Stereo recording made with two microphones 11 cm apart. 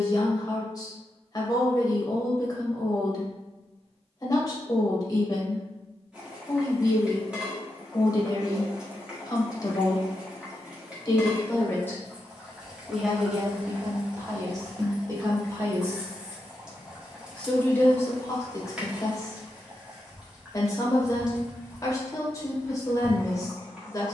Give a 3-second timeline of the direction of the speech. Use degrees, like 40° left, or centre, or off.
30° left, 30° left, 30° left, 30° left, 20° right, 10° right, 30° left, 30° left.